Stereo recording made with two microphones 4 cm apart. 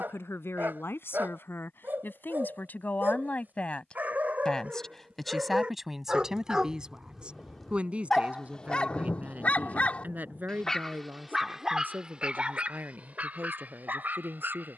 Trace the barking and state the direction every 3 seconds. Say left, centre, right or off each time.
right, right, centre, centre, right.